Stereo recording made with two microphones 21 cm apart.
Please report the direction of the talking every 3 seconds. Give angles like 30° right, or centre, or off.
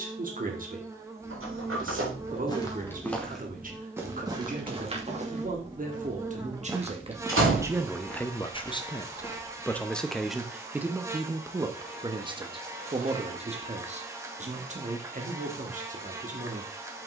40° right, 40° right, 10° right, centre, 30° right, 40° right.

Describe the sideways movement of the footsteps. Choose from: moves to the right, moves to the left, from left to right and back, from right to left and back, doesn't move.
from left to right and back.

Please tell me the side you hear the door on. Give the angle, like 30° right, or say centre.
80° right.